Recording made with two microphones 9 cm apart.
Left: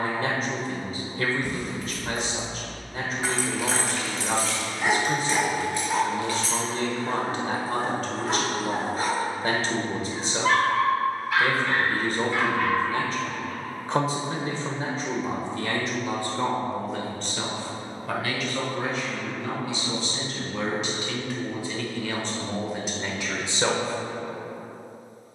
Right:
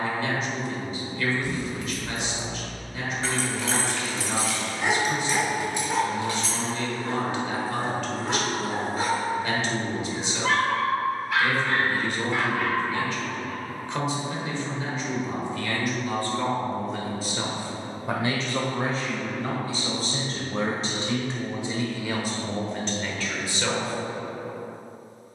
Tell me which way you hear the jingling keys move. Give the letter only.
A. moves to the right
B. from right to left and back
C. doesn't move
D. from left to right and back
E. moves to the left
A.